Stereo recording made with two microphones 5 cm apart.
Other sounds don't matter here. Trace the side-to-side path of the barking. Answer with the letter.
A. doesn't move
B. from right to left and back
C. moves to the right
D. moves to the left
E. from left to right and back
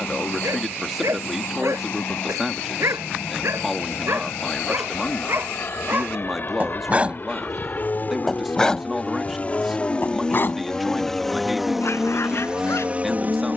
D.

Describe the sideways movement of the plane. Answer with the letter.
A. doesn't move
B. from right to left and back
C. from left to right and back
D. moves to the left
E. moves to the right
E.